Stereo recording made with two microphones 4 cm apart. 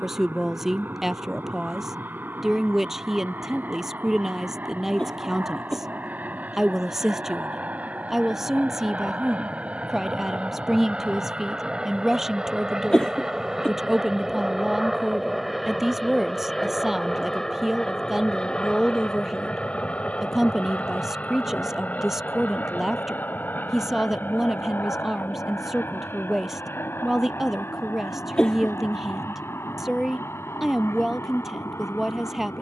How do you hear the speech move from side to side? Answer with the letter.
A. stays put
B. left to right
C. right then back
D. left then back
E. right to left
A.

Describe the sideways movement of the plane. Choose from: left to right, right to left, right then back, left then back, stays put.
right to left.